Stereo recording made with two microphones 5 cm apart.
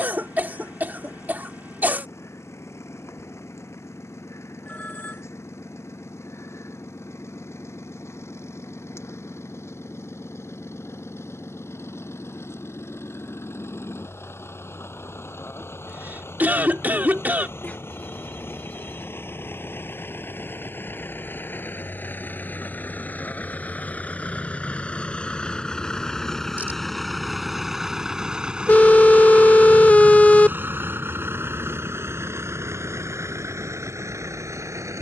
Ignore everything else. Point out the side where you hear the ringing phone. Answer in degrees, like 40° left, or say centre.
30° left.